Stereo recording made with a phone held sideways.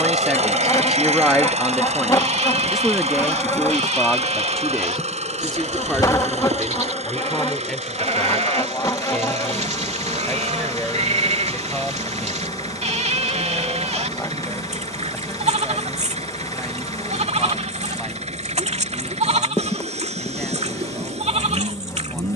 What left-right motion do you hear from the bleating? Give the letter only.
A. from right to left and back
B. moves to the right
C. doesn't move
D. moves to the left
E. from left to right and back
C.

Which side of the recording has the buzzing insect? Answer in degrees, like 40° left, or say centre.
20° left.